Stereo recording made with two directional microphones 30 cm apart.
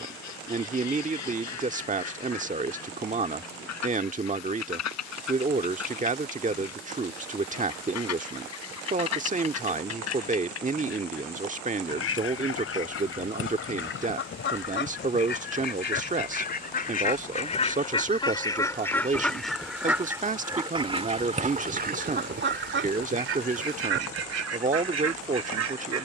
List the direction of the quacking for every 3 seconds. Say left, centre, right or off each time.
left, left, left, left, left, left, centre, right, right.